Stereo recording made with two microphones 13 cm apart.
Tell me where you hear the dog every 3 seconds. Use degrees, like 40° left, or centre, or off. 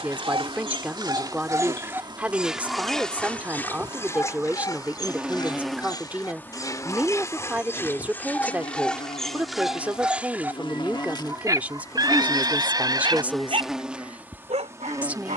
30° right, 20° left, 20° left, 10° right, 50° right.